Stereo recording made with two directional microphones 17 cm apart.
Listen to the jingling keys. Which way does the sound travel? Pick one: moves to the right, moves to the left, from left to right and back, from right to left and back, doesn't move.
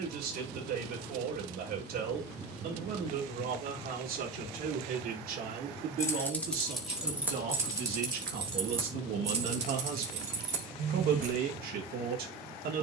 moves to the right.